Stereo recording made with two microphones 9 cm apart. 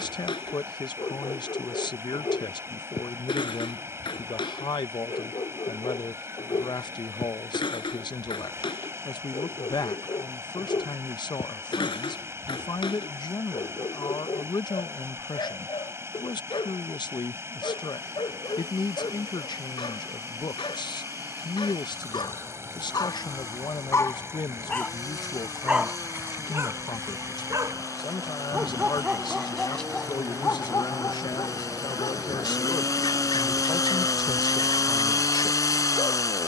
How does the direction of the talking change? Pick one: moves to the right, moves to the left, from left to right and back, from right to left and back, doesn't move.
doesn't move.